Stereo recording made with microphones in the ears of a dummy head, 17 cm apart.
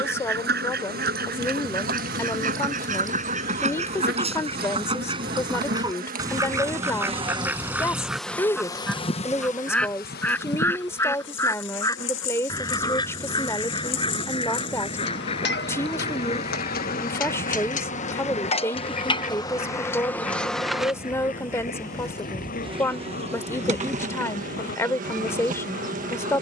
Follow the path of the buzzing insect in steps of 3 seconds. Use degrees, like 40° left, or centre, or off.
50° right, 50° right, 20° right, 50° left, 70° left, 50° left, 20° left, 20° right, 40° right.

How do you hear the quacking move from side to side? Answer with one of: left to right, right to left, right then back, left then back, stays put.
right to left.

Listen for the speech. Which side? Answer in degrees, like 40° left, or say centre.
10° left.